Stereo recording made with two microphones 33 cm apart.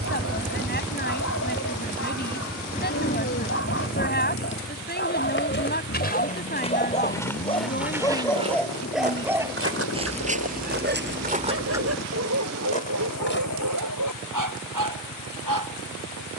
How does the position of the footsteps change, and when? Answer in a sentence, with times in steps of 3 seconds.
You can hear the footsteps not at all from 0 s, on the left from 3 s, in the centre from 6 s, on the right from 9 s, on the left from 12 s and not at all from 15 s.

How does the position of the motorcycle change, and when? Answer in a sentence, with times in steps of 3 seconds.
You can hear the motorcycle in the centre from 0 s and on the left from 3 s.